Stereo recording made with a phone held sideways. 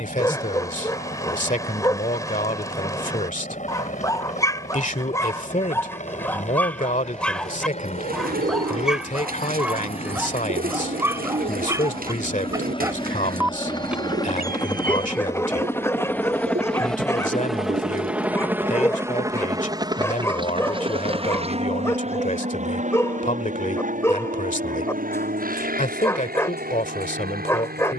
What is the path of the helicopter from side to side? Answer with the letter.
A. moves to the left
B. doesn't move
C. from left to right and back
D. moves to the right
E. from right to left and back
D.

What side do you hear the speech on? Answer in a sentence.
In this clip you hear the speech on the left.